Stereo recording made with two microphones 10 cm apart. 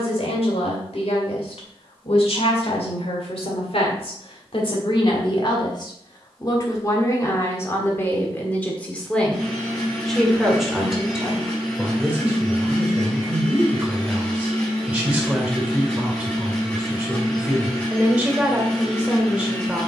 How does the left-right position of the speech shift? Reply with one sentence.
You can hear the speech go from the left side to the right.